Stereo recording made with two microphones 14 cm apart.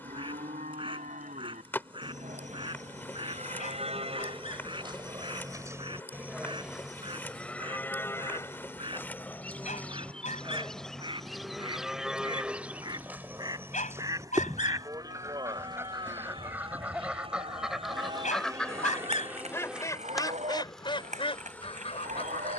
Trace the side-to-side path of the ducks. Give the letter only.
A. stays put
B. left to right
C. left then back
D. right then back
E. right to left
E.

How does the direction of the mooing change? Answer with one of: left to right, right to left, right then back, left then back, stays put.
left then back.